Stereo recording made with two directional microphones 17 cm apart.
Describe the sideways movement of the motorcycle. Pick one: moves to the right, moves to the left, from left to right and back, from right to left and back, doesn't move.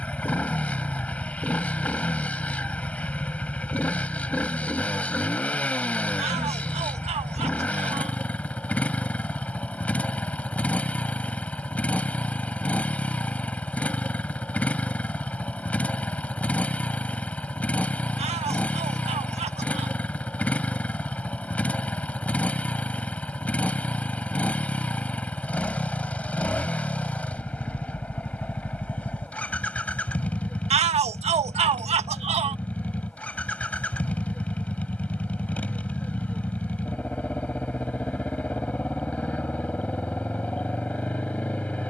doesn't move.